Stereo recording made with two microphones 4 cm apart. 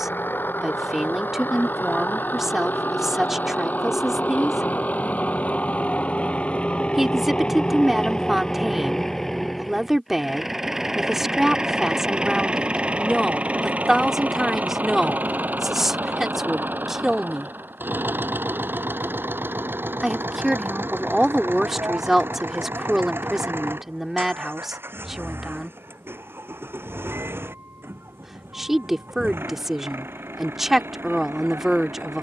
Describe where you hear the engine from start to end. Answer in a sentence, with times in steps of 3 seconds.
You can hear the engine on the left from 0 s, in the centre from 9 s and on the right from 12 s.